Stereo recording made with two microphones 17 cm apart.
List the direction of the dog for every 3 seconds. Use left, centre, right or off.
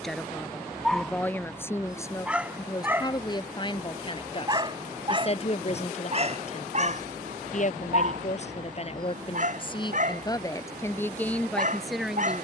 centre, right, right, right.